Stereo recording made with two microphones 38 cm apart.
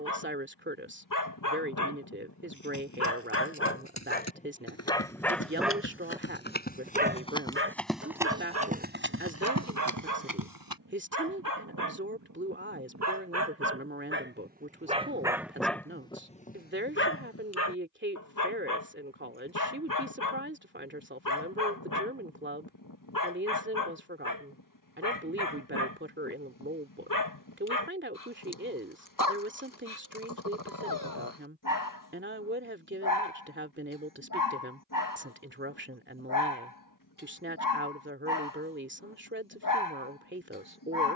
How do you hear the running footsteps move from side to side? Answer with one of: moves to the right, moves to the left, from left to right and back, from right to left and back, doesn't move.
moves to the right.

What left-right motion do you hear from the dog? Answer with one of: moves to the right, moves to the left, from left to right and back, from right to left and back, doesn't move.
from left to right and back.